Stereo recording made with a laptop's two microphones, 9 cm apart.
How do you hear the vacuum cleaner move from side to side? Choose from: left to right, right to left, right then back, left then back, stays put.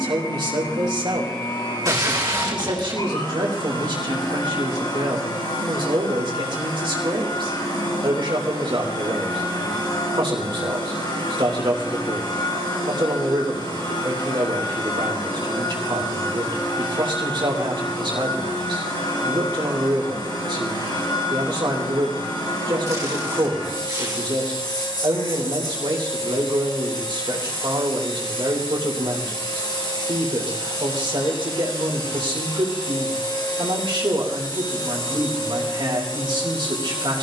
stays put.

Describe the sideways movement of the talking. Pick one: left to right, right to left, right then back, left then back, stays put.
stays put.